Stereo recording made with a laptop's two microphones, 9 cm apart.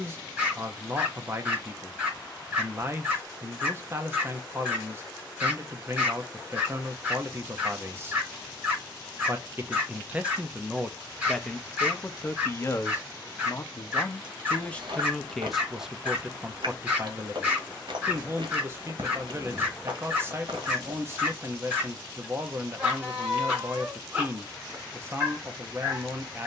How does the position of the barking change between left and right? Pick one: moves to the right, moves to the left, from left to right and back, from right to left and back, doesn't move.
doesn't move.